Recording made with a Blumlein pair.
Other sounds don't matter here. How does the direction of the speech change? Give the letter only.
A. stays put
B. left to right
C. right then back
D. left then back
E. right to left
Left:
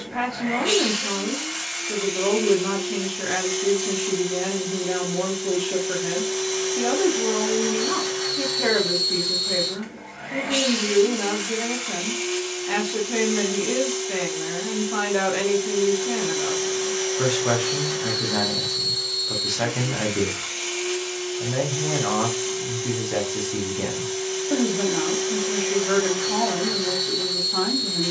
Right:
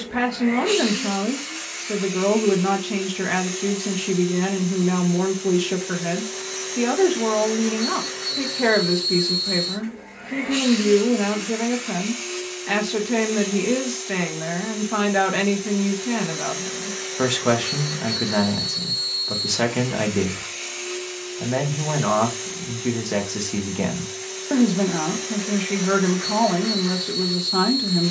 A.